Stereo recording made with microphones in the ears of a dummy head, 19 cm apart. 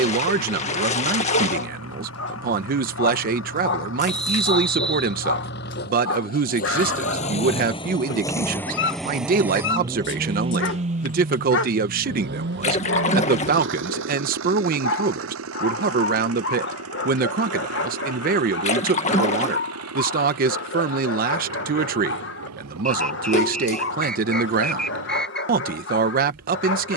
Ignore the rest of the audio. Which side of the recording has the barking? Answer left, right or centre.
left.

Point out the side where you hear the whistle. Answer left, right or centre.
centre.